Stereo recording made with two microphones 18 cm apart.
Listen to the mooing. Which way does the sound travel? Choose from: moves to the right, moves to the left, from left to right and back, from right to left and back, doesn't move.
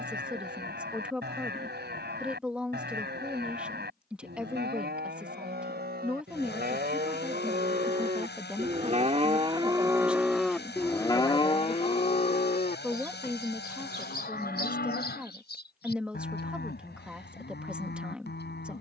moves to the left.